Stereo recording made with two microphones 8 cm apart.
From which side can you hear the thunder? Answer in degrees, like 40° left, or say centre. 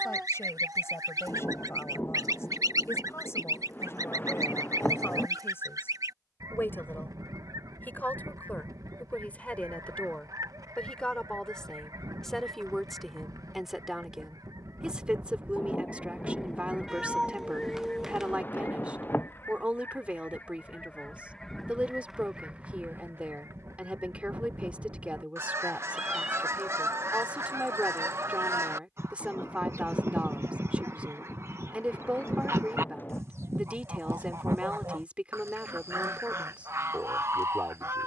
30° left.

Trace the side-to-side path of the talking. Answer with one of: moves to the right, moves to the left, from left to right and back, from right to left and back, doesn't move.
moves to the right.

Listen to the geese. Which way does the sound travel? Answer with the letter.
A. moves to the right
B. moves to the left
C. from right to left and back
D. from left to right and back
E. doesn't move
C.